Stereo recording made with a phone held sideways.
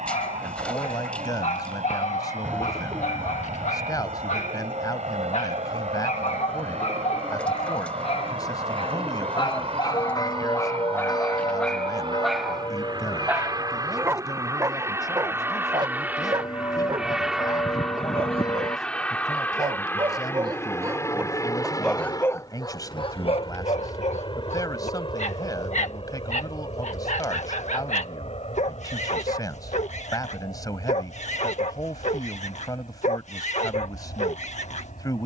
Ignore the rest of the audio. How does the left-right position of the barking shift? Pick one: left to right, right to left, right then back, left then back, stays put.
right then back.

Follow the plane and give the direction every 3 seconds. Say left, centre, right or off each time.
right, right, right, right, right, centre, centre, left, left, left, left, left.